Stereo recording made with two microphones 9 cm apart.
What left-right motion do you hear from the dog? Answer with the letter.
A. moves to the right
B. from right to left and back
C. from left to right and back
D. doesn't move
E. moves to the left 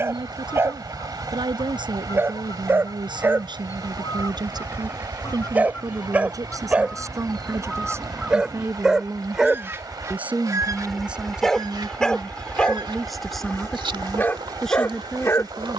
E.